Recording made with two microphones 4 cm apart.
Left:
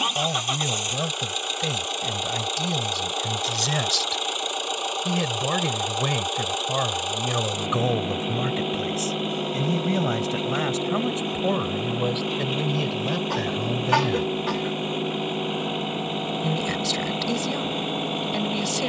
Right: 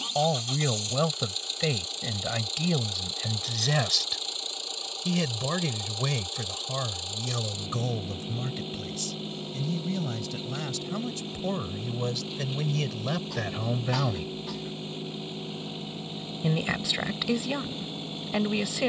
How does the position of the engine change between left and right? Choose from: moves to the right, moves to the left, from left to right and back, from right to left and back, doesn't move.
doesn't move.